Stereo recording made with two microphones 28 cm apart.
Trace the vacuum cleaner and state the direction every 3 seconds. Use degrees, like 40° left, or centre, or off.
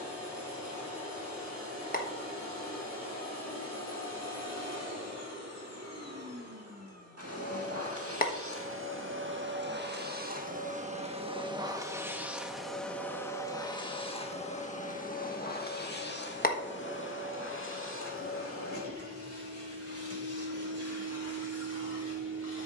80° right, 70° right, 60° right, 30° right, 10° left, 40° left, 50° left, 60° left.